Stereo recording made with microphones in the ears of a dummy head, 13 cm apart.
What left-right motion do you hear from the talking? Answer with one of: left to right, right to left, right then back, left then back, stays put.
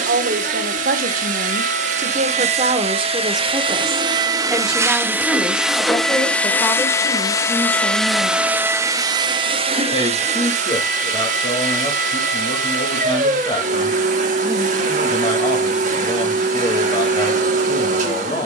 right to left.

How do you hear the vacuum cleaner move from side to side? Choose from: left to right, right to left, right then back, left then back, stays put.
left then back.